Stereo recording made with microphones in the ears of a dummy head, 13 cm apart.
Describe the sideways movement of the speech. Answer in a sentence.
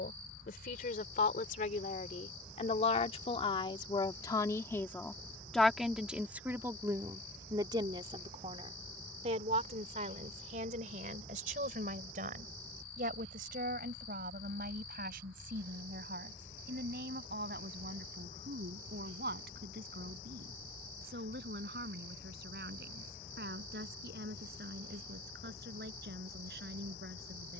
In this clip you hear the speech move from left to right.